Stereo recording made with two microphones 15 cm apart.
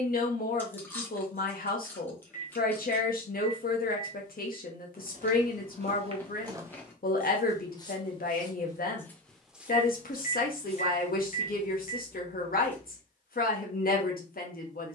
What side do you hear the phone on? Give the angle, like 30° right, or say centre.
60° left.